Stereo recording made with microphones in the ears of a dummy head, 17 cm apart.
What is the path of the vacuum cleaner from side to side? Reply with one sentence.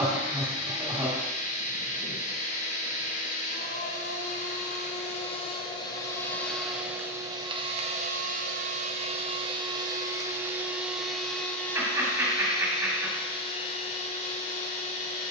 In this clip you hear the vacuum cleaner go right and come back.